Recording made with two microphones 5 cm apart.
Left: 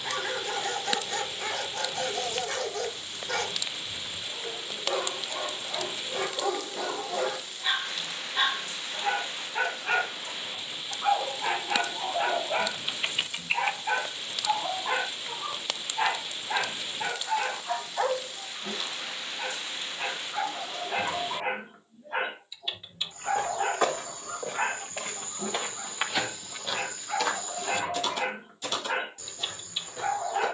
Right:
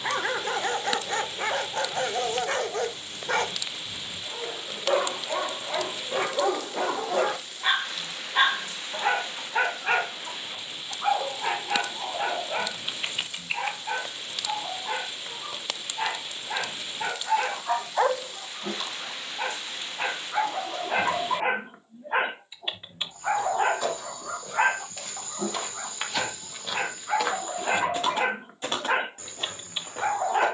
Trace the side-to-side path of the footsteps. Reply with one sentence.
In this clip you hear the footsteps move from left to right.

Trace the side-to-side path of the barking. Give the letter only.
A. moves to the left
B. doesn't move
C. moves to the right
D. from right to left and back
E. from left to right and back
D.